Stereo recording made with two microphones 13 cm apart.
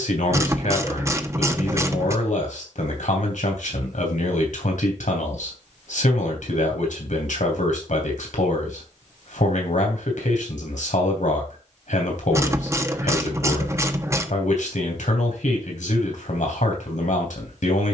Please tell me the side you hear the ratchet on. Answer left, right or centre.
right.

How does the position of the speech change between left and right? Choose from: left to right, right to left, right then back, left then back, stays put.
stays put.